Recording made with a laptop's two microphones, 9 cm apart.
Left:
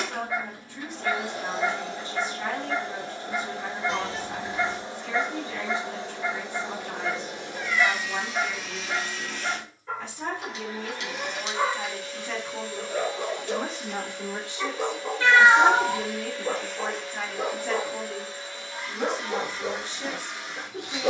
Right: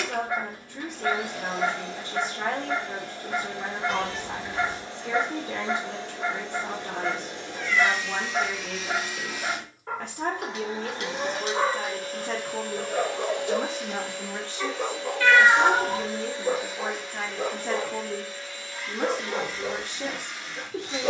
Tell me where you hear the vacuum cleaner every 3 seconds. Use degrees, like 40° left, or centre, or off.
30° left, 20° left, 10° left, 20° right, 60° right, 20° right, 20° left.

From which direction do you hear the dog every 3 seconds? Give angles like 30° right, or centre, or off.
70° right, 70° right, 70° right, 60° right, 10° right, 10° left, 10° left.